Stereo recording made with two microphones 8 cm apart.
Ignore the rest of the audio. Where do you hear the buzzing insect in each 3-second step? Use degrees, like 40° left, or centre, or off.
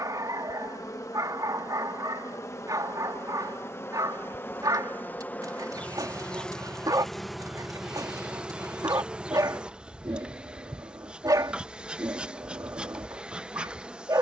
40° left, 30° left, centre, 10° right, 10° right.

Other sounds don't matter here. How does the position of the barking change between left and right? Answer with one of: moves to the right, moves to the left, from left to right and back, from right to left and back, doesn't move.
doesn't move.